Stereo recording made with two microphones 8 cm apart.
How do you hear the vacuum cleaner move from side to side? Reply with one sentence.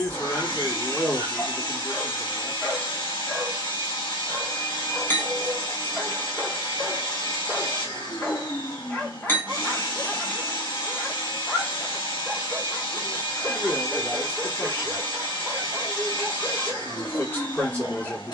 You can hear the vacuum cleaner stay put.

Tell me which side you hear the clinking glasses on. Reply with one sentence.
In this clip you hear the clinking glasses on the left.